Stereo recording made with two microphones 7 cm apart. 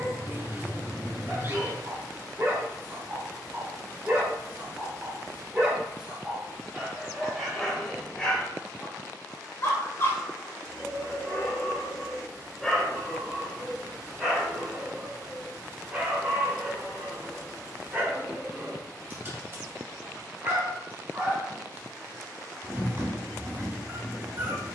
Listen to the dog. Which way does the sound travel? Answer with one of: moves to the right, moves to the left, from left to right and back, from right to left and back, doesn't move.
from right to left and back.